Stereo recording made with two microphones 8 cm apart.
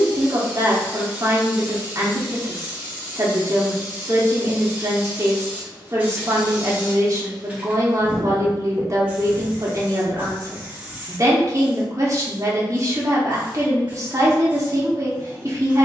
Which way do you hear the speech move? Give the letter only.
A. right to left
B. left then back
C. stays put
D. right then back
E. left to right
C.